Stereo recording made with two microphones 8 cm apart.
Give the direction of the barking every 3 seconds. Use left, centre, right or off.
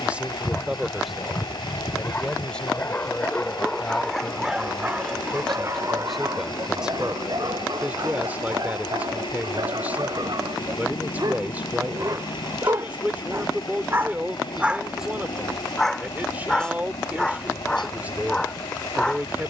left, centre, right, right, right, centre, centre.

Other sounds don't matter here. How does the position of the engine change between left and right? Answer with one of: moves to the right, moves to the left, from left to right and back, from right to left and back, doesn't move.
doesn't move.